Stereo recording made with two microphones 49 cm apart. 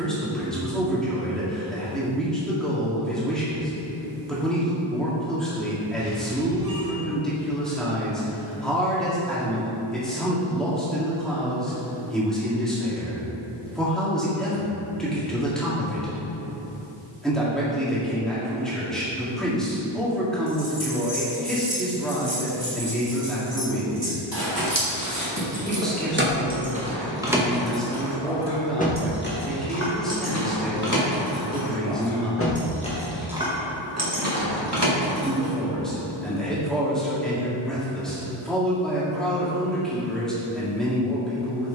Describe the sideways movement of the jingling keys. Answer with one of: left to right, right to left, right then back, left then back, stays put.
left then back.